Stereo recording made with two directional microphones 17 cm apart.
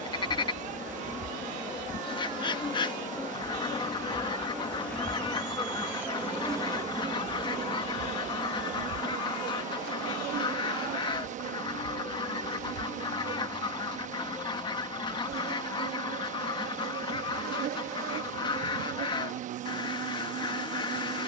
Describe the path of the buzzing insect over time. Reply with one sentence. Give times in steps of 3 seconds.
In this clip you hear the buzzing insect on the left from 0 s, in the centre from 3 s and on the right from 6 s.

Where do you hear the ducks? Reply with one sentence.
You can hear the ducks on the left.